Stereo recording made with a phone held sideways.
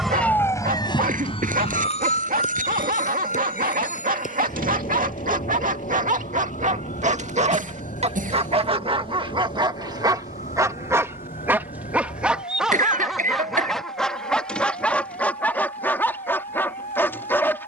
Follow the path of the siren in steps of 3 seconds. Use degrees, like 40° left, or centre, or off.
40° left, 60° left, 60° left, 70° left, 70° left, 70° left.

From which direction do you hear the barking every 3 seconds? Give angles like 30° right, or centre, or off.
80° right, 70° right, 50° right, 30° right, centre, 10° left.